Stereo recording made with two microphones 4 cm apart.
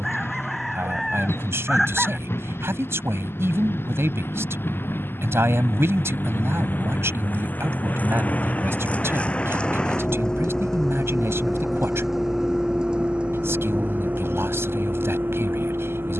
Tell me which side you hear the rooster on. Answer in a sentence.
In this clip you hear the rooster in the centre.